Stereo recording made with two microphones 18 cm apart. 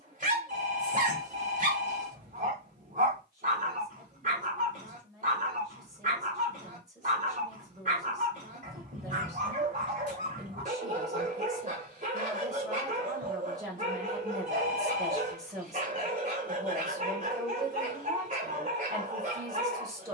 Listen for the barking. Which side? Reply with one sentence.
You can hear the barking on the right.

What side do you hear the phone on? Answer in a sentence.
In this clip you hear the phone on the right.